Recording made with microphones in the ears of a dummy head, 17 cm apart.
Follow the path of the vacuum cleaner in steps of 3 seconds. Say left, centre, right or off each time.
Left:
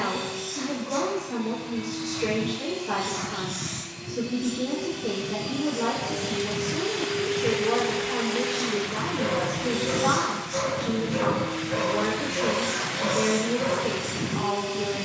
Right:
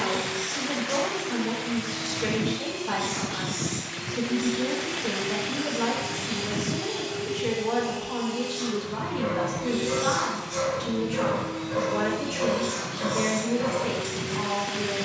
right, right, centre, left, left.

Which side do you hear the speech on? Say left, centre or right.
right.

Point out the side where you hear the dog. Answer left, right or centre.
left.